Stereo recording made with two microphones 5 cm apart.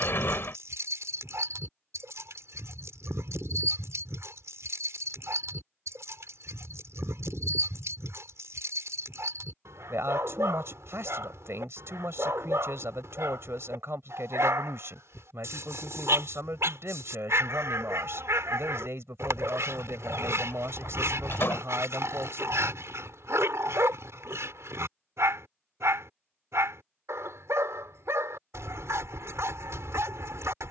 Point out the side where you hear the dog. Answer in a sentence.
You can hear the dog on the right.